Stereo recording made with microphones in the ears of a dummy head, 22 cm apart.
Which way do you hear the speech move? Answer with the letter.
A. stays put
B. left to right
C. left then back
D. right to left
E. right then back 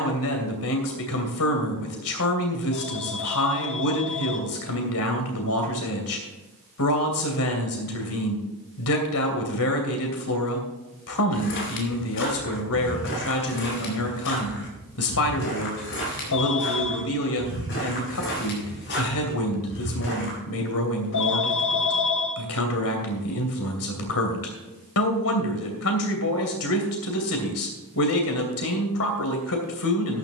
A.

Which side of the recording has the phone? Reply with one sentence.
In this clip you hear the phone on the left.